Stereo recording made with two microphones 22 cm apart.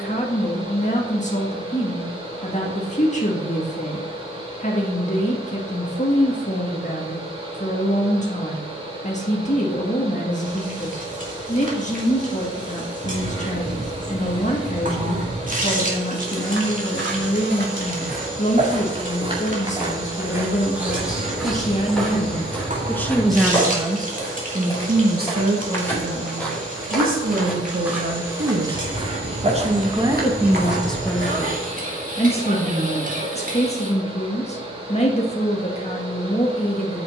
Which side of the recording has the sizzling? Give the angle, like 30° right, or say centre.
40° right.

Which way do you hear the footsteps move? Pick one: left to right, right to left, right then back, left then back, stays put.
left then back.